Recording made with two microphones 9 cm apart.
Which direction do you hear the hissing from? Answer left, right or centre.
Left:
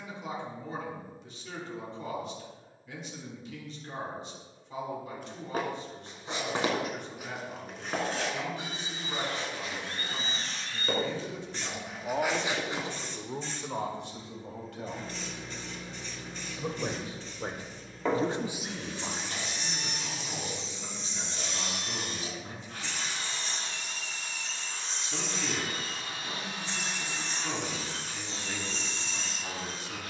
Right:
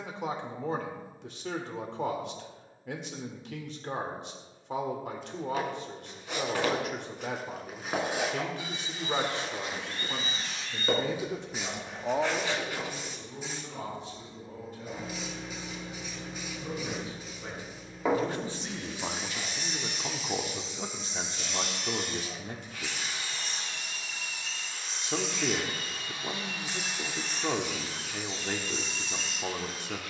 centre.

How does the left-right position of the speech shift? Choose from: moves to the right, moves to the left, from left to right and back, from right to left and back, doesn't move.
from right to left and back.